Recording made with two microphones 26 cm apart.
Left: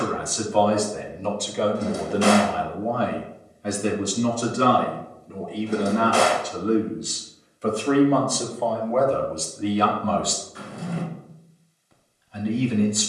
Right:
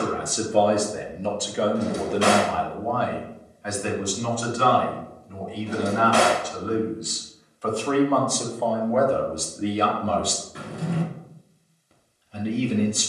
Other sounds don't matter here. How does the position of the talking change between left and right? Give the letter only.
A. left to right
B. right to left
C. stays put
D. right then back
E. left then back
E.